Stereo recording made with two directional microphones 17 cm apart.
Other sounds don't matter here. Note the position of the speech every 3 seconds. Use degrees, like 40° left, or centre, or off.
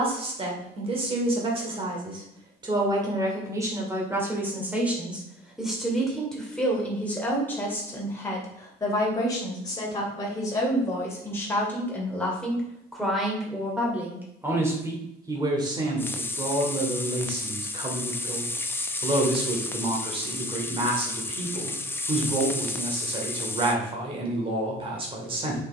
30° right, 10° right, 10° left, 20° left, centre, 30° right, 30° right, 30° right, 30° right.